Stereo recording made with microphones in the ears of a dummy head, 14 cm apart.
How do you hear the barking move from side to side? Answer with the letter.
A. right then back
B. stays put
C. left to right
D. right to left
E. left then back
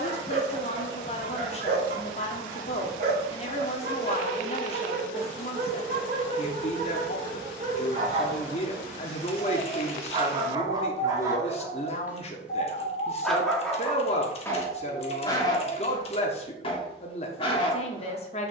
D.